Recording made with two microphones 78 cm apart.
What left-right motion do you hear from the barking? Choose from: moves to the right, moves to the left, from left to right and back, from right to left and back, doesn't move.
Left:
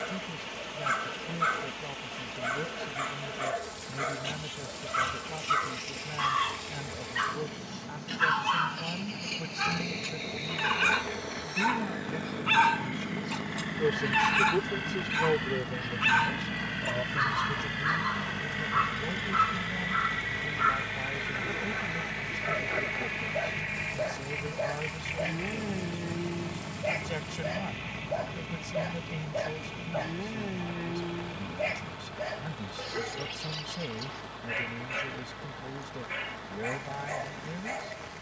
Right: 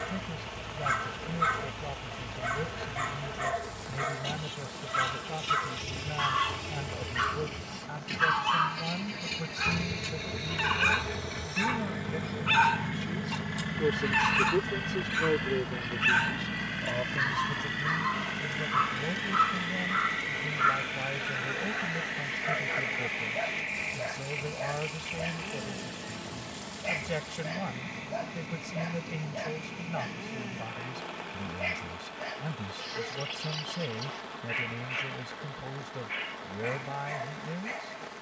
moves to the left.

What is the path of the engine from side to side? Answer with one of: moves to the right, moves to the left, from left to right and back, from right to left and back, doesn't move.
moves to the left.